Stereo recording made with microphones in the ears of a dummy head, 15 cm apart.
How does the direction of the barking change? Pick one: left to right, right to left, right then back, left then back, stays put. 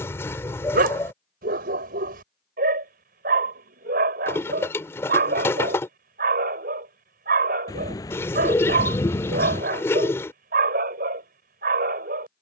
stays put.